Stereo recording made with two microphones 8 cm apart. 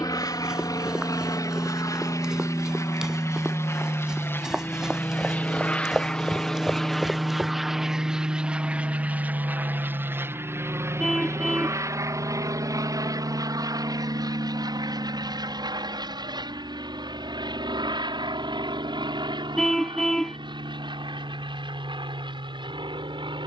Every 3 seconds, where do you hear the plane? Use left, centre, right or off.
left, left, centre, right, right, right, right, right.